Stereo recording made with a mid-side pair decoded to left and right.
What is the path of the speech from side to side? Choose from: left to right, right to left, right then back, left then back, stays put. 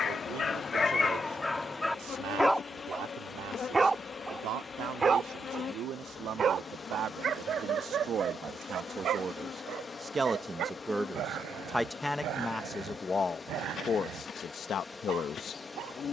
right to left.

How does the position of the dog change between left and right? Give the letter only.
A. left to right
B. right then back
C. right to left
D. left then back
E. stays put
A.